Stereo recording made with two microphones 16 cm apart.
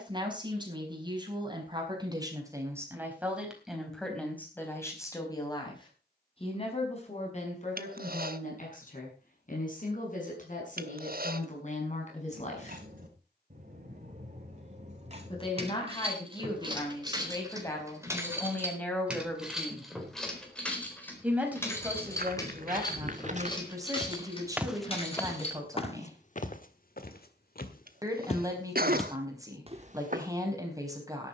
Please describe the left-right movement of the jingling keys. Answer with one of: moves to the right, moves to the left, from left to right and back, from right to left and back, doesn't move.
moves to the left.